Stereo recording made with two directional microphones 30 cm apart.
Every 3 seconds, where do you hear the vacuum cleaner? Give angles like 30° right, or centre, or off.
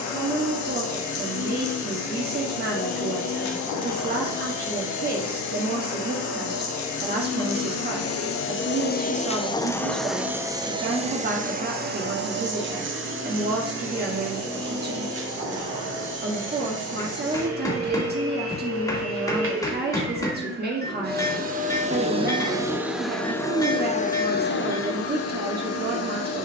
70° left, 70° left, 60° left, 10° right, 40° right, 50° right, 40° right, 10° right, 50° left.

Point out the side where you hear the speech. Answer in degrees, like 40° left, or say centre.
30° right.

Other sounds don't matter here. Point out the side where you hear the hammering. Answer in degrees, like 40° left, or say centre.
10° left.